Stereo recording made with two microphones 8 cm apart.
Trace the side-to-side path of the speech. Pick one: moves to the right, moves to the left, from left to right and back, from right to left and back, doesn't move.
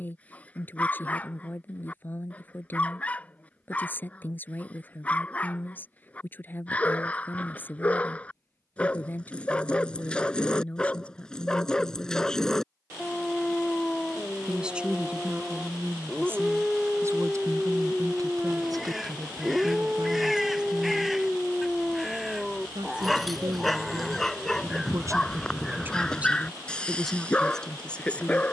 from left to right and back.